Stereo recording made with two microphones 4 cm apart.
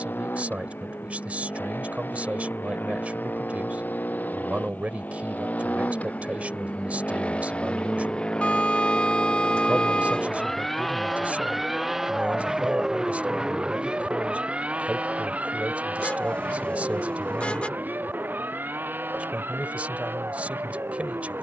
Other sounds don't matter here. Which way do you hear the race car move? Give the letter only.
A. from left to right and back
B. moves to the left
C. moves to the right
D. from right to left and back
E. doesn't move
C.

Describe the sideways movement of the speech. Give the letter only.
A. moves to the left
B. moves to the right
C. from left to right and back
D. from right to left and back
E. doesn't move
E.